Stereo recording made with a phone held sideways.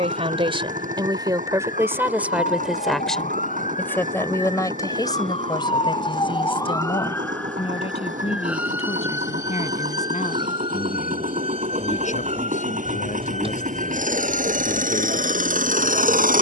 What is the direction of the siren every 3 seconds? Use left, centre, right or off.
left, left, centre, right, right, off.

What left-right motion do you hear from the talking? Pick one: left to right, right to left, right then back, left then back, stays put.
right to left.